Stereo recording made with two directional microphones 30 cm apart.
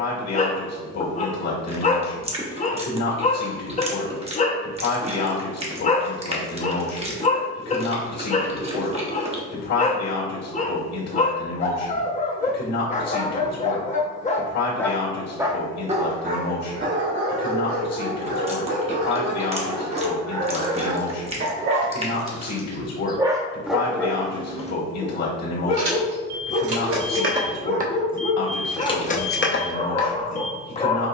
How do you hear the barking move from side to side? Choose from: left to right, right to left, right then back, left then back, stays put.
right then back.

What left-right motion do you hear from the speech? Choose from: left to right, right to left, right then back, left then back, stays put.
stays put.